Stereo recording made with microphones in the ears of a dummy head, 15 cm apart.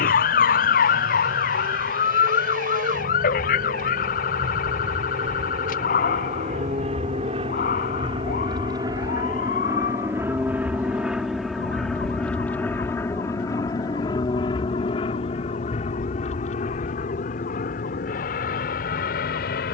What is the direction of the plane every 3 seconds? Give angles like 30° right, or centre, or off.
60° right, 50° right, 30° right, 10° right, 20° left, 40° left, 50° left.